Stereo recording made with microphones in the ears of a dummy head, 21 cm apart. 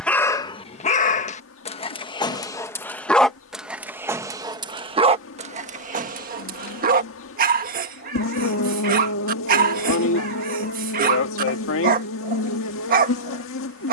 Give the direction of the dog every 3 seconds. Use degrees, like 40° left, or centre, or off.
20° left, 20° right, 40° right, 40° right, 40° right.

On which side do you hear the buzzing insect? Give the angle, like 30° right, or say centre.
60° left.